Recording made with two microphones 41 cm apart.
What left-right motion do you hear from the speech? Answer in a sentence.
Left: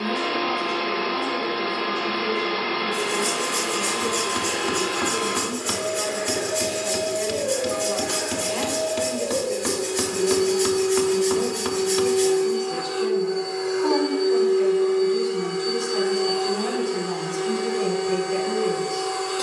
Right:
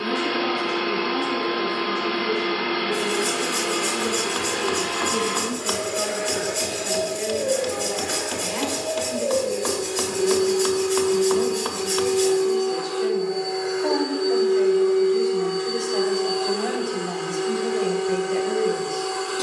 You can hear the speech go from the right side to the left.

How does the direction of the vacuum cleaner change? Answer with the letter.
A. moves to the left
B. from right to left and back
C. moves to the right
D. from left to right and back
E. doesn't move
B.